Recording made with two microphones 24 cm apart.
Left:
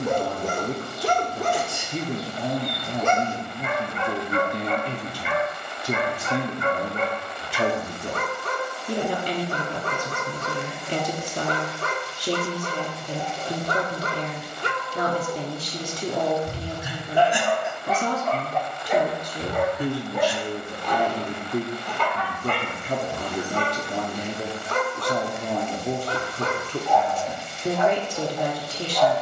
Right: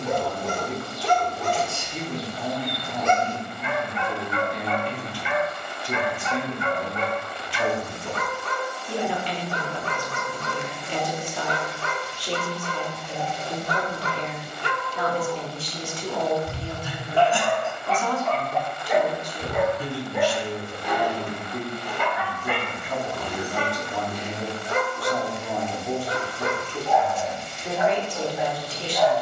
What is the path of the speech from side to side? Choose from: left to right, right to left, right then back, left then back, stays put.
stays put.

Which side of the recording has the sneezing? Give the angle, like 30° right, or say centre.
10° left.